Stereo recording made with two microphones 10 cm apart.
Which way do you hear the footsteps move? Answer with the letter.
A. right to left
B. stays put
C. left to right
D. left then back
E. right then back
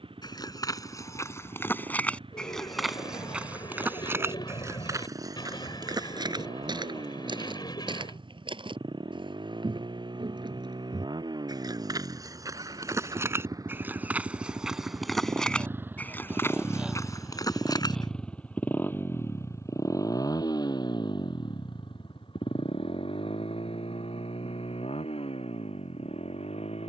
E.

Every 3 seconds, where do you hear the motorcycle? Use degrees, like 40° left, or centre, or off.
60° right, 60° right, 60° right, 50° right, 40° right, 10° right, 30° left, 60° left, 70° left.